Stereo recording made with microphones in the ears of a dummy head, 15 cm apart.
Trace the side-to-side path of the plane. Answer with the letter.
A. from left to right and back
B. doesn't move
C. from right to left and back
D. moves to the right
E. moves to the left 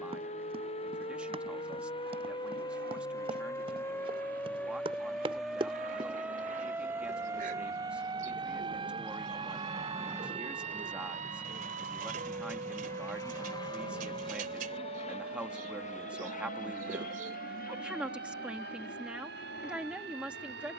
E.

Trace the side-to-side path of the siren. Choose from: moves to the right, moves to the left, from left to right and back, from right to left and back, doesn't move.
moves to the right.